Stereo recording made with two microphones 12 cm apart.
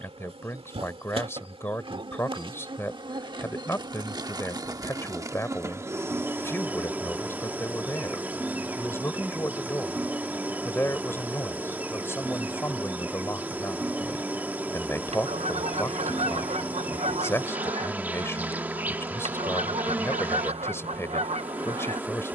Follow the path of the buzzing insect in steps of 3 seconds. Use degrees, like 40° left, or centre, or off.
50° right, 30° right, 20° right, 10° right, 10° right, 10° right, 10° right, 10° right.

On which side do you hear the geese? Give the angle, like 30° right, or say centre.
70° right.